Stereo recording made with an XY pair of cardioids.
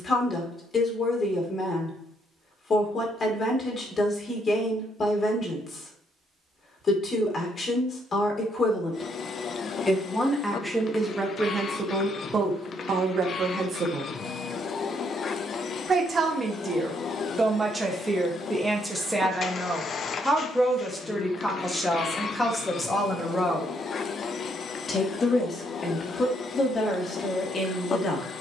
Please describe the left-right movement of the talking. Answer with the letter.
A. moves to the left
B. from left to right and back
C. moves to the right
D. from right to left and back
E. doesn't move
B.